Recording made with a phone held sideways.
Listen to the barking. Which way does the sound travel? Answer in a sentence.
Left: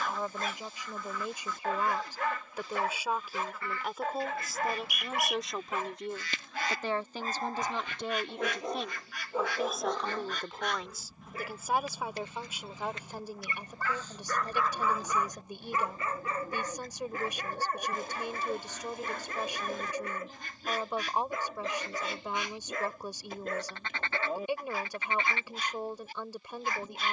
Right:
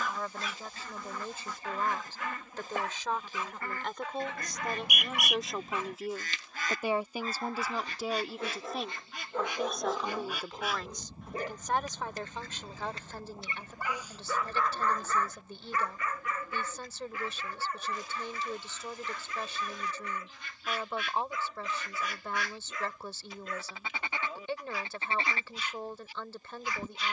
You can hear the barking move from left to right and back again.